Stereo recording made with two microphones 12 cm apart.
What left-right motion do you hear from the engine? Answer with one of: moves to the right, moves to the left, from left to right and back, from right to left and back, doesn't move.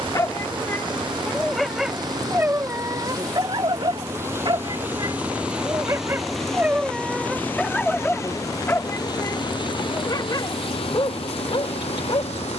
moves to the left.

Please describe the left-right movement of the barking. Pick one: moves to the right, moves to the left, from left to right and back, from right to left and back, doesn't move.
from left to right and back.